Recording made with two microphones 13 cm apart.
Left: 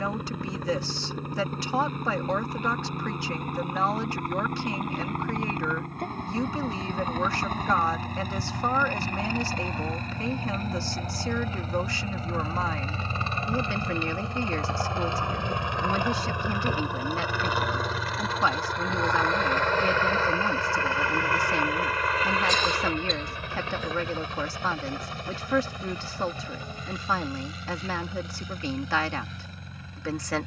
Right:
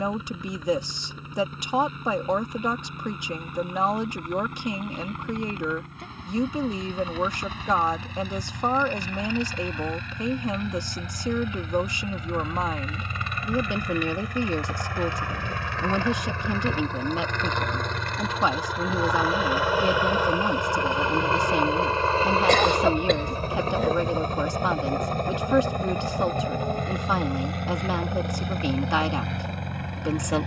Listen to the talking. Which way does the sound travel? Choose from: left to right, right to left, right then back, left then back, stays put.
stays put.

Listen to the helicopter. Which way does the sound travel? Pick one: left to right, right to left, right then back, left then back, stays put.
left to right.